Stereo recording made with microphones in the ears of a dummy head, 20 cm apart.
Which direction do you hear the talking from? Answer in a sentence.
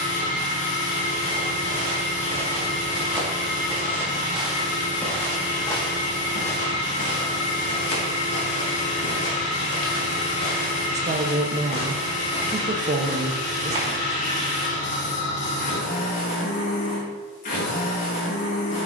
In this clip you hear the talking on the right.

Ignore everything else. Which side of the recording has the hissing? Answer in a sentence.
You can hear the hissing on the left.